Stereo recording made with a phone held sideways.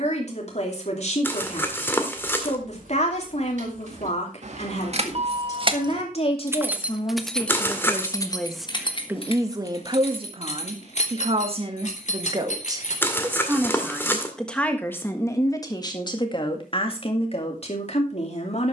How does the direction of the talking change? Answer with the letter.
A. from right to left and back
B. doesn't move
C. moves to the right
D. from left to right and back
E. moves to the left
D.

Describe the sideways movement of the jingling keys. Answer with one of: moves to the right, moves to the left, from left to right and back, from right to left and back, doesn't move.
moves to the left.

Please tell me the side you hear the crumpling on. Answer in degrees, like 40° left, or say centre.
20° left.